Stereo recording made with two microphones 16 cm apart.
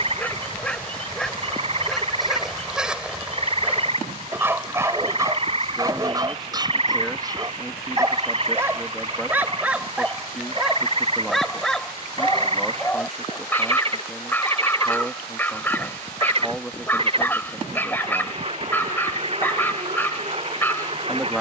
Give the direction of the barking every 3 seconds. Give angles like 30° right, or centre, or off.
centre, 10° right, 20° right, centre, 10° left, 10° left, 10° left.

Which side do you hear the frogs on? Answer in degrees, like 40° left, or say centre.
40° right.